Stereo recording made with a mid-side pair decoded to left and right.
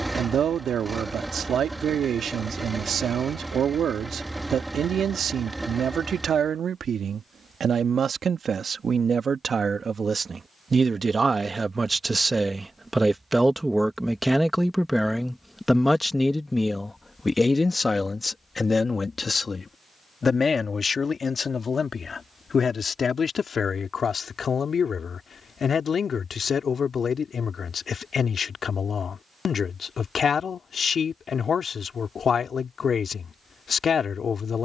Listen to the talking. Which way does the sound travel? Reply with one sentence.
In this clip you hear the talking travel towards the left.